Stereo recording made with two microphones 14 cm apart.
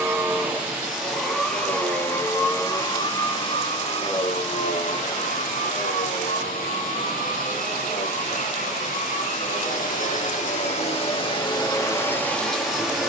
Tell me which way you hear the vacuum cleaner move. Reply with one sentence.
You can hear the vacuum cleaner move from right to left and back again.